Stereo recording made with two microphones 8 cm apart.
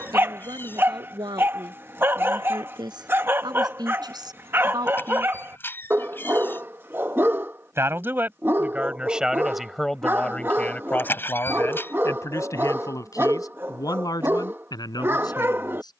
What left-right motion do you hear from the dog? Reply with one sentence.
You can hear the dog stay put.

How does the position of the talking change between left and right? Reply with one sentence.
In this clip you hear the talking travel towards the left.